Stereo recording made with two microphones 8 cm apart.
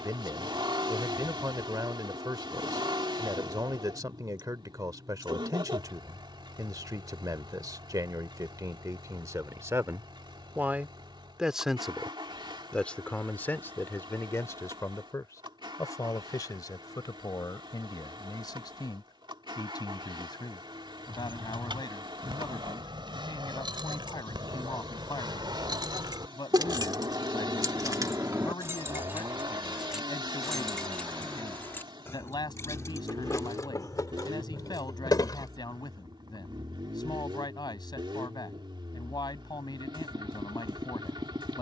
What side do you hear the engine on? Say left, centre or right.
right.